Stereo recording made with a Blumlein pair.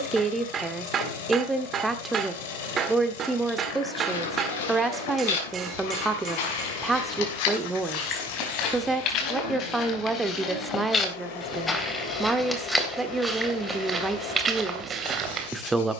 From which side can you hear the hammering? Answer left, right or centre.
right.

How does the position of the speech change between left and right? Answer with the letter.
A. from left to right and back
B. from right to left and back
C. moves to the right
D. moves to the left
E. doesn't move
E.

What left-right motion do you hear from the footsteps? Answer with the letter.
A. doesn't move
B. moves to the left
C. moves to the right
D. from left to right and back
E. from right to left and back
C.